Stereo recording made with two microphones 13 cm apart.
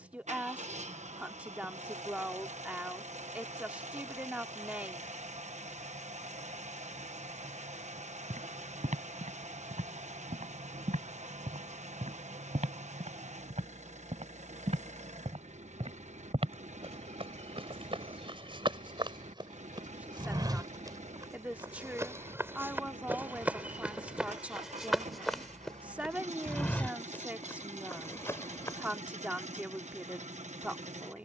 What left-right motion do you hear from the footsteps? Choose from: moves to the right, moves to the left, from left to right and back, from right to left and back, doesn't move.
moves to the left.